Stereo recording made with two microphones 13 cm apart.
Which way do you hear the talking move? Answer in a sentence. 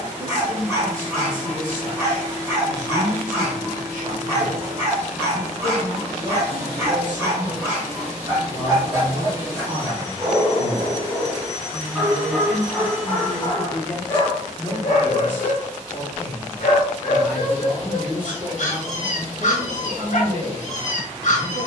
You can hear the talking go left and come back.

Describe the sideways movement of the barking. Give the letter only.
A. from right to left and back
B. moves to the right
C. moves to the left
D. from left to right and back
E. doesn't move
C.